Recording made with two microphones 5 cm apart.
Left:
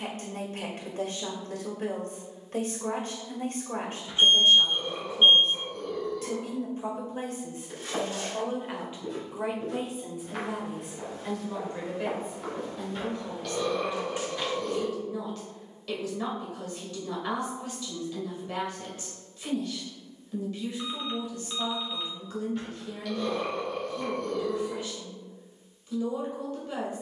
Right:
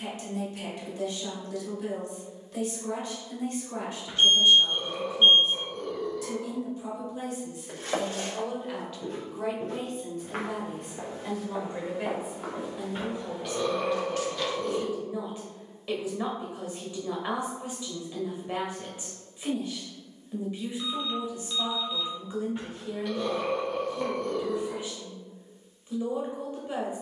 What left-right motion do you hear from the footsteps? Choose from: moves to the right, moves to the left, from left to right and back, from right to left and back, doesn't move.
moves to the left.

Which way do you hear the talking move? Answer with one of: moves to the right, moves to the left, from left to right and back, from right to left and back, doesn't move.
moves to the right.